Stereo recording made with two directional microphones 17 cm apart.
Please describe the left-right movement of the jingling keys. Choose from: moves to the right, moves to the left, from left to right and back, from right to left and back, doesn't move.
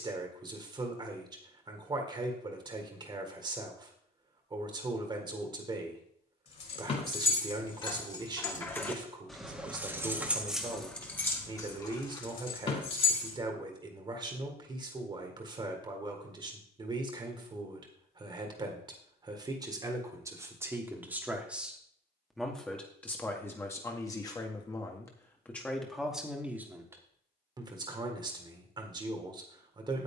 from left to right and back.